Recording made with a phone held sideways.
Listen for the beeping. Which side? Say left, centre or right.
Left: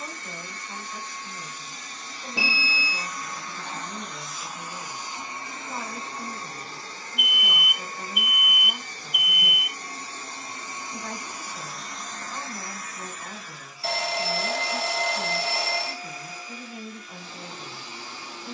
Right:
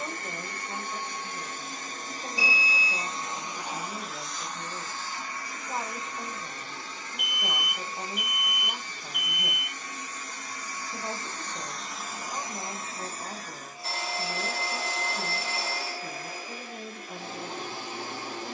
left.